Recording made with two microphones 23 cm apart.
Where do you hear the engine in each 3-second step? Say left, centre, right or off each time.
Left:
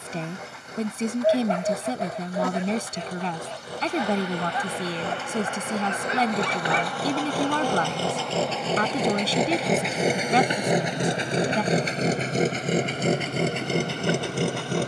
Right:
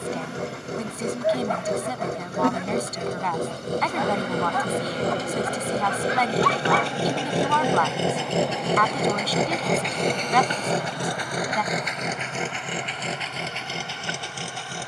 right, right, right, centre, left.